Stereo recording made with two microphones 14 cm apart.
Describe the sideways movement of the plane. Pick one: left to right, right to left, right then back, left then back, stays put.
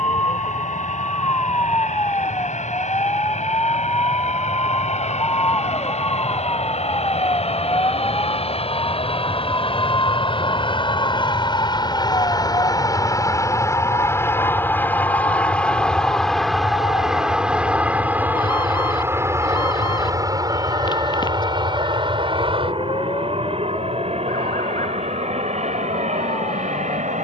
left to right.